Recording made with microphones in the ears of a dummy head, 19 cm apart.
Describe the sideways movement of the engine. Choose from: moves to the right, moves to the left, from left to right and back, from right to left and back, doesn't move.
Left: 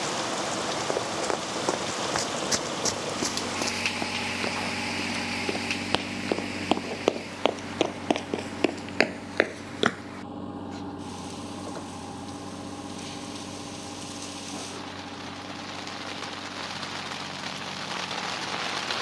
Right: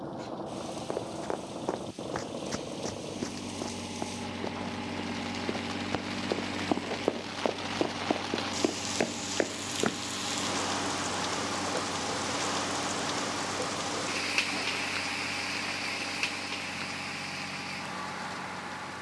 moves to the right.